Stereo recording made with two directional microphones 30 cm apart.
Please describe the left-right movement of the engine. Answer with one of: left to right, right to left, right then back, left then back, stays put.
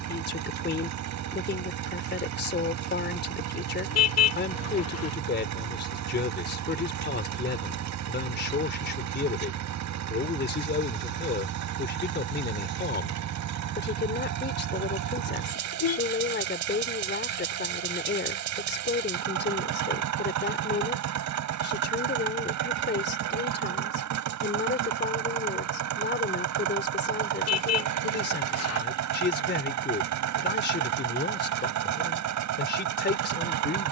stays put.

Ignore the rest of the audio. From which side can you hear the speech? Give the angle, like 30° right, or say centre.
40° left.